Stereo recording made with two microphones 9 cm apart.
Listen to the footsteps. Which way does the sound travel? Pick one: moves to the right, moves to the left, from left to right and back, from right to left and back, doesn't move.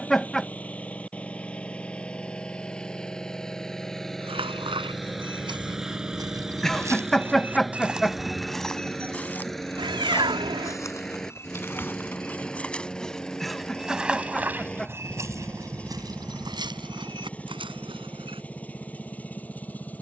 from right to left and back.